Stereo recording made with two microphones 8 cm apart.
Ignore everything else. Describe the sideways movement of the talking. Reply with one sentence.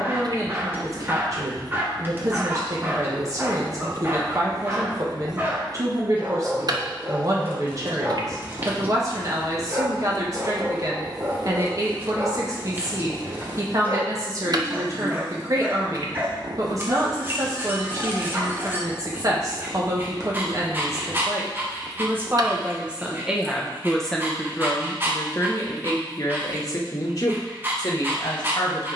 In this clip you hear the talking move to the left.